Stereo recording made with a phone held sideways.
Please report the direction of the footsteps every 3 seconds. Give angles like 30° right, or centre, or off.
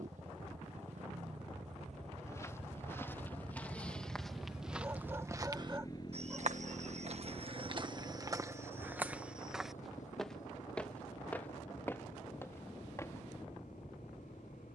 20° left, centre, 40° right, centre, 20° left.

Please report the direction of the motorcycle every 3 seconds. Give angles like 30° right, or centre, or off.
60° right, 10° right, 50° left, 70° left, 70° left.